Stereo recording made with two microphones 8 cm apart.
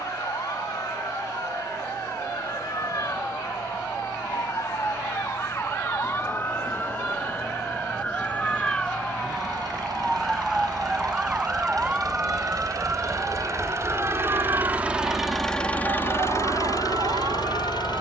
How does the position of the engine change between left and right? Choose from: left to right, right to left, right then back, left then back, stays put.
right to left.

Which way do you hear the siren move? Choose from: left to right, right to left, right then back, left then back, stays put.
left to right.